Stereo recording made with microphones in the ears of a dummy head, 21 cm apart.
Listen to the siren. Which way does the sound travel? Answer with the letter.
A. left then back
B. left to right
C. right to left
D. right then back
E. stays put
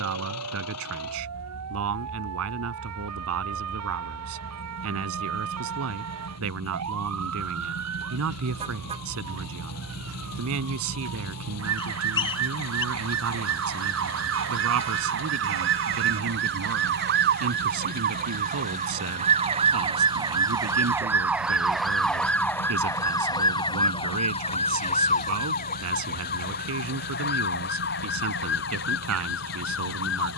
C.